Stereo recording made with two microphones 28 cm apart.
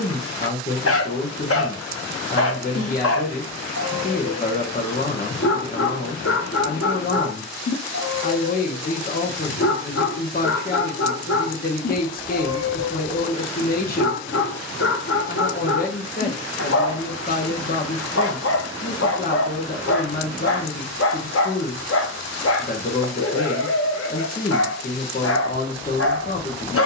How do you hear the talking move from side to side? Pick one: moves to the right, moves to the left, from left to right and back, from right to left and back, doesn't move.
doesn't move.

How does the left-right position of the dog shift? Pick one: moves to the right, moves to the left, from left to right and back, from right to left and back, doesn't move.
doesn't move.